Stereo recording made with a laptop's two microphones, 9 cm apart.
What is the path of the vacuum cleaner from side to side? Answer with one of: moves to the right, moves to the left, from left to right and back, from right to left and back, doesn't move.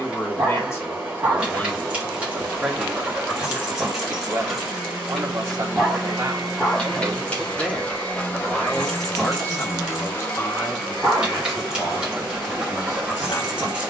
from right to left and back.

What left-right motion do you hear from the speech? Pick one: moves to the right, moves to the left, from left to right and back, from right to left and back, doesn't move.
from left to right and back.